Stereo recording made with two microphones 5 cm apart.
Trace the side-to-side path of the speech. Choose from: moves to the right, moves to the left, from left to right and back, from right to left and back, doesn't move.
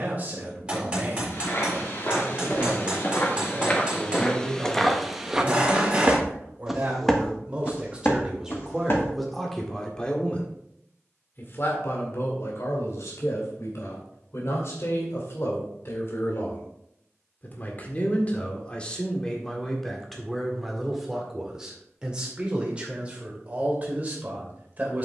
from right to left and back.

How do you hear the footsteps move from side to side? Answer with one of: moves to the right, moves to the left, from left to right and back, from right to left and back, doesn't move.
from left to right and back.